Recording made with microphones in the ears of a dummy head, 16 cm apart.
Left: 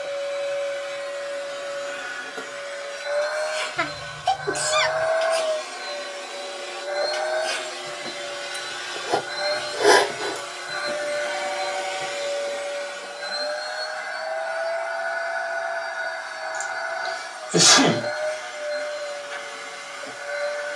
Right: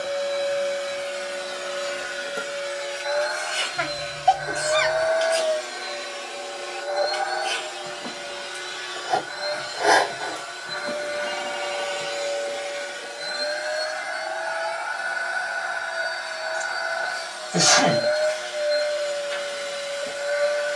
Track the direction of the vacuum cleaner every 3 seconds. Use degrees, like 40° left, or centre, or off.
50° right, 20° right, 10° left, 30° left, 20° right, 40° right, 40° right.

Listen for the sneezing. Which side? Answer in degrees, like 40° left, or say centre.
40° left.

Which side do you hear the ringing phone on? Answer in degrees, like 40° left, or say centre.
70° right.